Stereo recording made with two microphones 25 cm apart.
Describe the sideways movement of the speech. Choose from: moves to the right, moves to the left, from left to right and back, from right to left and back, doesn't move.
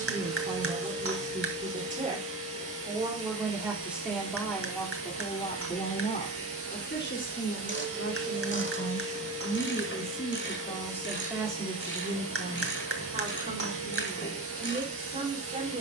from right to left and back.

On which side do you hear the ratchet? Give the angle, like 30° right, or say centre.
50° left.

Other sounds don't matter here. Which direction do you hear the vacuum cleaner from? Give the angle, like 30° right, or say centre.
60° right.